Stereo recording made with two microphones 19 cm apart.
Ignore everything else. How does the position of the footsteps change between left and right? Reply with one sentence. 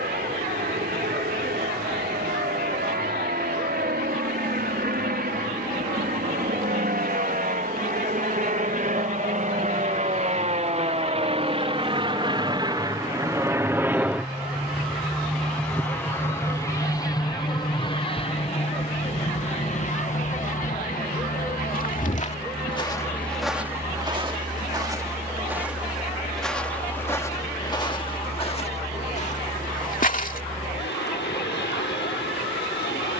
You can hear the footsteps go right and come back.